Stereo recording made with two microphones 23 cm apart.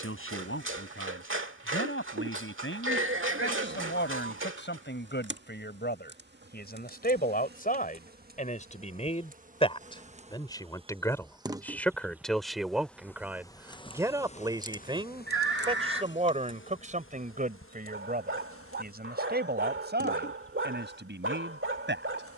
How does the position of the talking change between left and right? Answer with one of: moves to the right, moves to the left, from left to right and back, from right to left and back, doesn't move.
moves to the right.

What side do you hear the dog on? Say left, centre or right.
right.